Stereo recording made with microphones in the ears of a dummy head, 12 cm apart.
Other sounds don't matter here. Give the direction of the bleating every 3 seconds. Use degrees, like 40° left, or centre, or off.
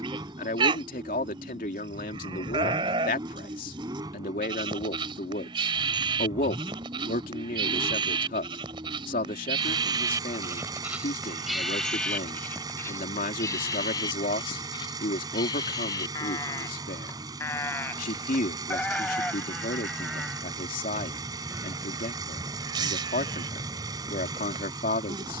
40° right, 40° right, 40° right, 20° right, 20° left, 20° left, centre, 30° right, 30° right.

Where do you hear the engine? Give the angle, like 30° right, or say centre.
30° right.